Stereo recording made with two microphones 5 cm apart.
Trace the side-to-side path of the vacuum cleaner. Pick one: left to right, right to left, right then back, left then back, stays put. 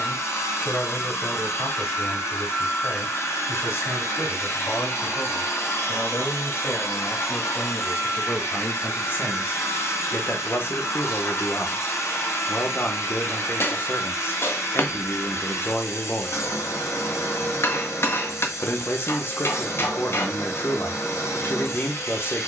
stays put.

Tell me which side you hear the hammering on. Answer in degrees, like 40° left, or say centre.
60° left.